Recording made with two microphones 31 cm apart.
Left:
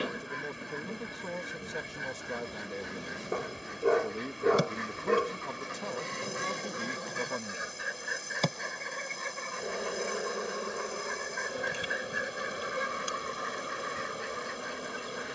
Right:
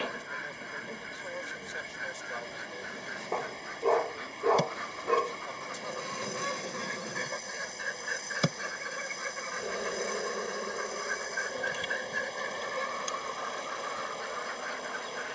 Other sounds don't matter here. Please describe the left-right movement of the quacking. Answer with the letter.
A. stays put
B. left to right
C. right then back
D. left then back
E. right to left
C.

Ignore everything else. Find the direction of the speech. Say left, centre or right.
left.